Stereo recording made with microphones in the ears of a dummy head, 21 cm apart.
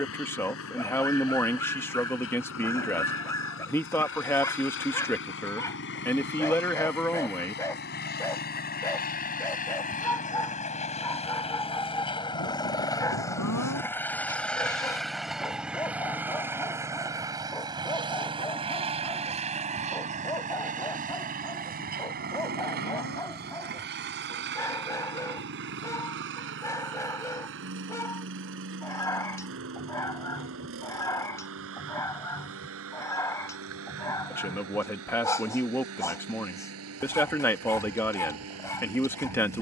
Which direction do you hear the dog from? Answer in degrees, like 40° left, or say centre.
10° left.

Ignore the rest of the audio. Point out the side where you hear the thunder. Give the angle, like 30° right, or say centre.
80° left.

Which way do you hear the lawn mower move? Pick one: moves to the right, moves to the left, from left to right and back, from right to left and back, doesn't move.
moves to the right.